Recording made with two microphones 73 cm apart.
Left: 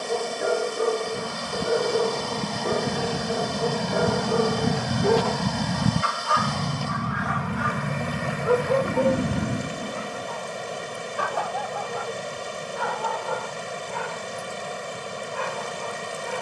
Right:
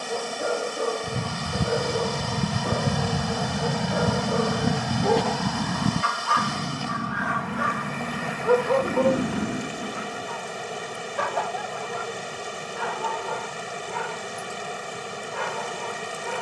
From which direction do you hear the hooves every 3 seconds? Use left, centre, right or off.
right, centre, left, left, off, off.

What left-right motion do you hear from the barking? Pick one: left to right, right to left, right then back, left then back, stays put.
left to right.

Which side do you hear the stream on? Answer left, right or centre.
centre.